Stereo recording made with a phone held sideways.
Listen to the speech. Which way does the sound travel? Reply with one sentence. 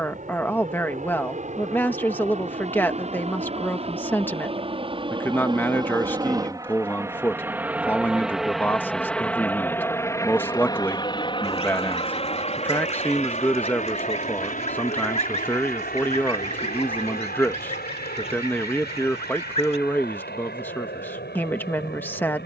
You can hear the speech stay in one place.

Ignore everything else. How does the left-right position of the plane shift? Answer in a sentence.
You can hear the plane move from right to left.